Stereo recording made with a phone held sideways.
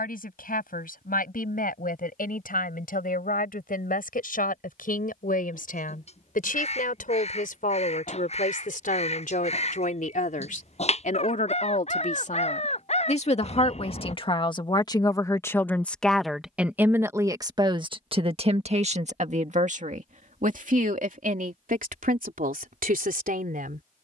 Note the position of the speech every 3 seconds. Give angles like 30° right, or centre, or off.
80° left, 70° left, 70° left, 60° left, 40° left, 10° right, 50° right, 70° right.